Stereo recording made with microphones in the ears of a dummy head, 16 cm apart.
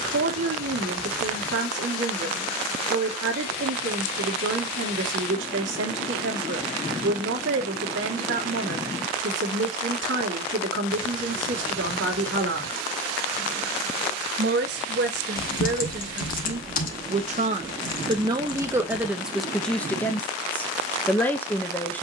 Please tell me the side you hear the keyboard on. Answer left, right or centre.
left.